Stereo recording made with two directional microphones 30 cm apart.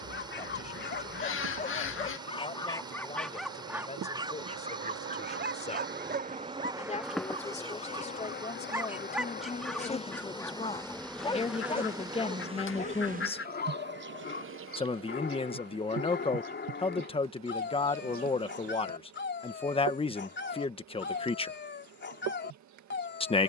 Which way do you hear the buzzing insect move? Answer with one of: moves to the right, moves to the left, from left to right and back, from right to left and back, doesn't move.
from right to left and back.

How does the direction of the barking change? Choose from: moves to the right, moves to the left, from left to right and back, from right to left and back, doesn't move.
from left to right and back.